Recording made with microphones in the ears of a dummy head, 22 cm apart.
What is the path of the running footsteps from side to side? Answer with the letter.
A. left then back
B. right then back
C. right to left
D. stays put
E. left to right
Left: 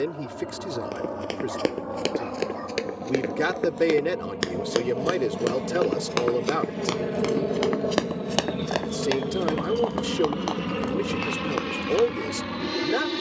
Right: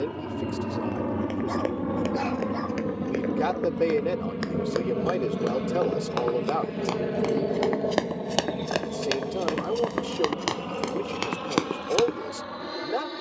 E.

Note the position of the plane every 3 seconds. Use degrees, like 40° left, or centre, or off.
40° right, 20° right, centre, 30° left, 40° left.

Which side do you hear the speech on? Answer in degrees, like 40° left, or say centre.
30° left.